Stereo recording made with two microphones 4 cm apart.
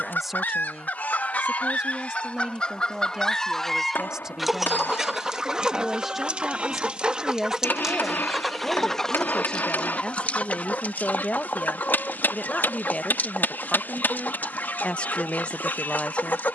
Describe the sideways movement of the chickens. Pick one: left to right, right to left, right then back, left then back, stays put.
right then back.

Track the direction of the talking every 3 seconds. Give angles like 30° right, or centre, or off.
20° right, 20° right, centre, 30° left, 30° left, 30° left.